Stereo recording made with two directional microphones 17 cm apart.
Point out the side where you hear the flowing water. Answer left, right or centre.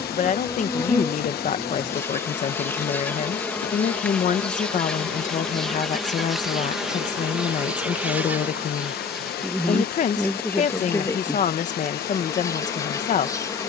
left.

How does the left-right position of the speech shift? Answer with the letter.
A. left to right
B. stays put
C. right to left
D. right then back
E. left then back
B.